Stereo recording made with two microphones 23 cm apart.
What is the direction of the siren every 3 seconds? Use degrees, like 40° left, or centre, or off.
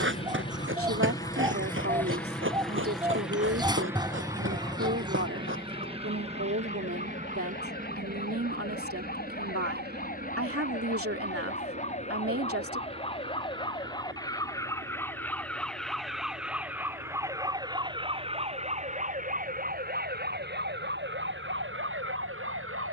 50° left, 50° left, 40° left, 40° left, 20° left, centre, 40° right, 60° right.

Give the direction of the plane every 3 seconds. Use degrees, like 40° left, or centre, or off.
10° left, 10° right, 30° right, 40° right, 50° right, 60° right, 60° right, 60° right.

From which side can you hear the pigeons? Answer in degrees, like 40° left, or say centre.
20° right.